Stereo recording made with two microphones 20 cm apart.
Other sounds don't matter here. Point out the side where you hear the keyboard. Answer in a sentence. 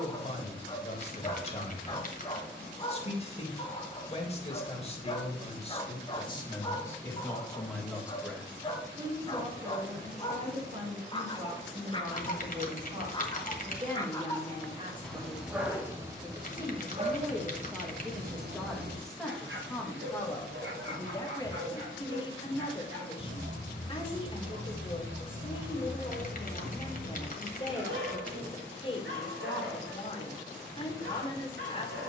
In this clip you hear the keyboard on the left.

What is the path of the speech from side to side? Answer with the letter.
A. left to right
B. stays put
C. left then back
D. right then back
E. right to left
D.